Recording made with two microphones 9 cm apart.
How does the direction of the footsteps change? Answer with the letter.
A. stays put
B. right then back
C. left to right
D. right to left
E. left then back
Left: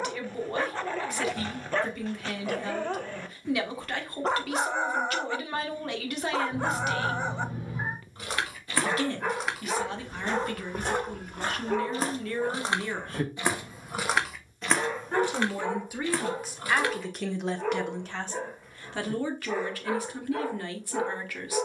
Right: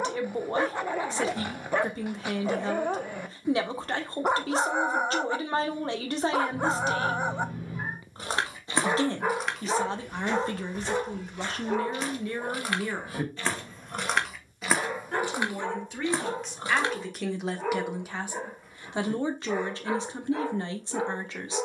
E.